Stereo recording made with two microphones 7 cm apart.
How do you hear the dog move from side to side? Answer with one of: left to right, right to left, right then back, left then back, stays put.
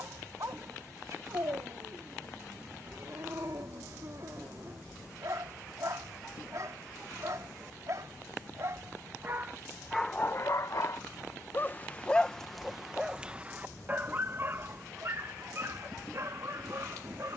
left then back.